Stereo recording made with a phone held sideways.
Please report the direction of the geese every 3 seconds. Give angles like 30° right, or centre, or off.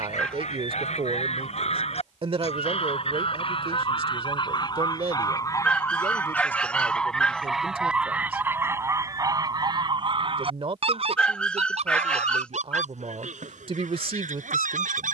50° left, 30° left, centre, 40° right, 60° right.